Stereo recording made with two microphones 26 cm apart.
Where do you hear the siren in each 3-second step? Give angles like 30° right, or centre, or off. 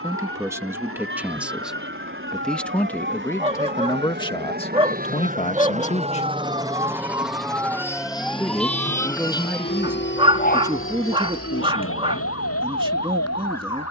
50° right, 40° right, 10° right, 30° left, 70° left.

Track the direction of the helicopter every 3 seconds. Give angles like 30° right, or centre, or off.
60° right, 40° right, centre, 50° left, 60° left.